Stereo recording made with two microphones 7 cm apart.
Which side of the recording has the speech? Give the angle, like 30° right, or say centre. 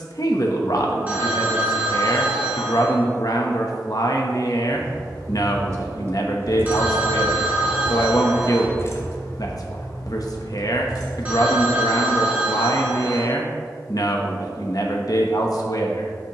60° left.